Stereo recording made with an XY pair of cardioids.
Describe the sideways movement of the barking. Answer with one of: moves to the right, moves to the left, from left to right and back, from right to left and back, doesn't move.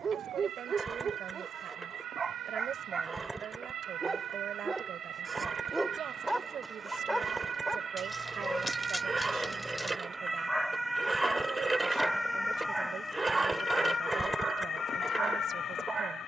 from right to left and back.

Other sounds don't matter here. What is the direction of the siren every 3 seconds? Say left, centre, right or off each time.
right, right, right, centre, left, left.